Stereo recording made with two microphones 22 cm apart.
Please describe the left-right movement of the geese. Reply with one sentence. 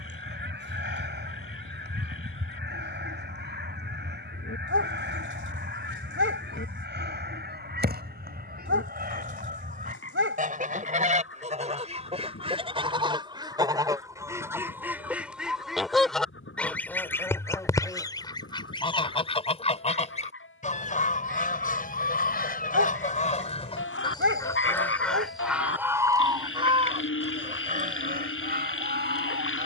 In this clip you hear the geese go left and come back.